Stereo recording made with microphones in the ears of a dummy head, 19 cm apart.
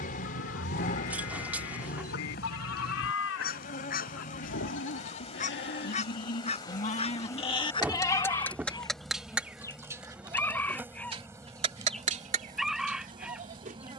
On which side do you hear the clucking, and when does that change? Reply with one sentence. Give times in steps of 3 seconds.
You can hear the clucking on the left from 0 s and in the centre from 9 s.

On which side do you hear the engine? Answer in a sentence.
You can hear the engine on the left.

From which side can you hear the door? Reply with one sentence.
You can hear the door in the centre.